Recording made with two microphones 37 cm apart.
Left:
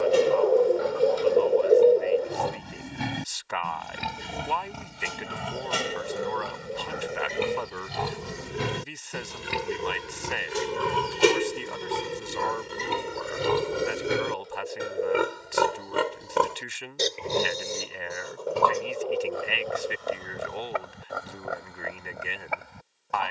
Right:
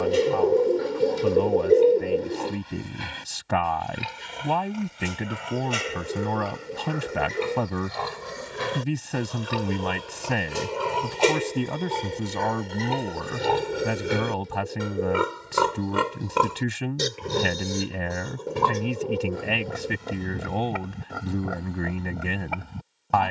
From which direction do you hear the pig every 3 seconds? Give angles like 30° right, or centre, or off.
70° left, 60° left, 50° left, 30° left, 10° left, 20° right, 40° right, 50° right.